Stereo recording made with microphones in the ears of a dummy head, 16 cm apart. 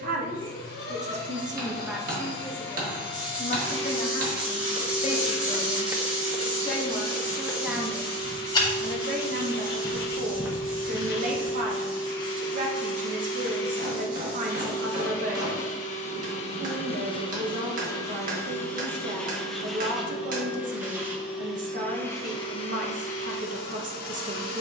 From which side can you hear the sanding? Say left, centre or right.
right.